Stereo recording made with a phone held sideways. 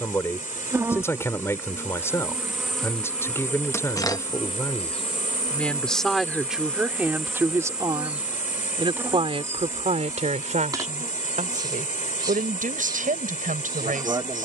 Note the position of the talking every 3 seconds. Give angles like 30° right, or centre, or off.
20° left, 20° left, 10° right, 50° right, 70° right.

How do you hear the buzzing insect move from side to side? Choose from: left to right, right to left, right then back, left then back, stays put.
left then back.